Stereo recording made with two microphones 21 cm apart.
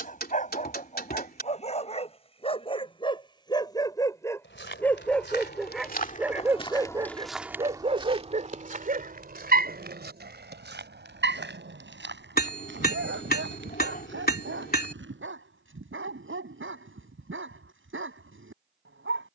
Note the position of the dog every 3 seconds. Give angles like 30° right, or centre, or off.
30° left, 10° left, 20° right, 60° right, 80° right, 80° right, 80° right.